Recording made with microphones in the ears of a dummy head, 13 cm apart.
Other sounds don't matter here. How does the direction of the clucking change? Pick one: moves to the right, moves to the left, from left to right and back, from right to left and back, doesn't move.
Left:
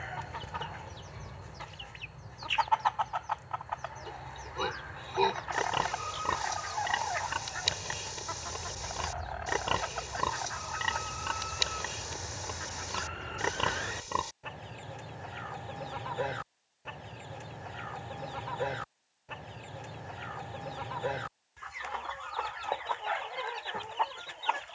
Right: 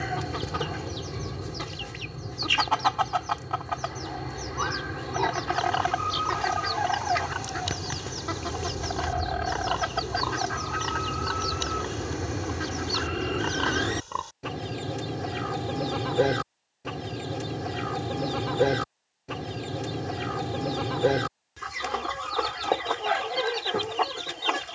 doesn't move.